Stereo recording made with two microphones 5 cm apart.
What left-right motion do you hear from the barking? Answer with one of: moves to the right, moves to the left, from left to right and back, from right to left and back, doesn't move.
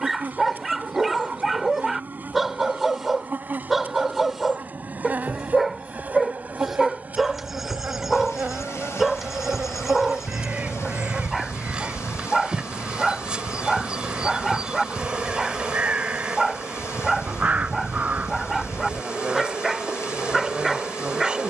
doesn't move.